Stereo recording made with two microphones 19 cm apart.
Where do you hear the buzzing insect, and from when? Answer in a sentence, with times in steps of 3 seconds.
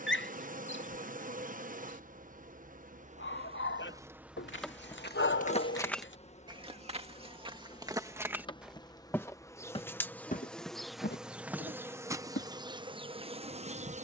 In this clip you hear the buzzing insect on the right from 0 s, in the centre from 3 s, on the left from 6 s, in the centre from 9 s and on the right from 12 s.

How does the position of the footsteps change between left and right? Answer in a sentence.
You can hear the footsteps go right and come back.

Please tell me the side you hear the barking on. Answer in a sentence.
In this clip you hear the barking on the left.